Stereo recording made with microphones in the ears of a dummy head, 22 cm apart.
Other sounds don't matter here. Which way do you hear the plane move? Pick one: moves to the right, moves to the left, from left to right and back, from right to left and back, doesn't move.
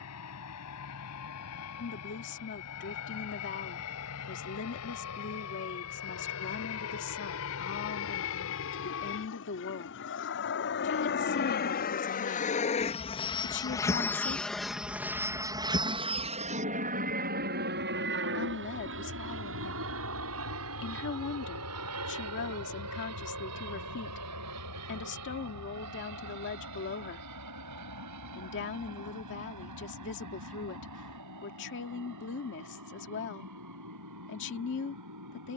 moves to the right.